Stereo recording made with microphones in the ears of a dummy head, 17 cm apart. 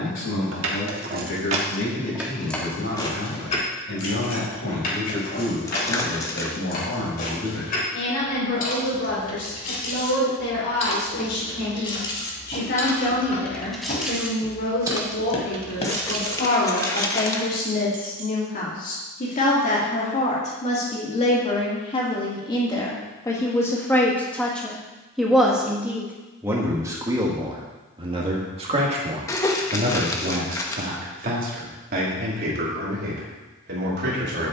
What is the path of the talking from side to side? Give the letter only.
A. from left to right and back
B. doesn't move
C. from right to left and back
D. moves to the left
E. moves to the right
E.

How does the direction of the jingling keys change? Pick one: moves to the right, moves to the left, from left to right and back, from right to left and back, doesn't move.
from right to left and back.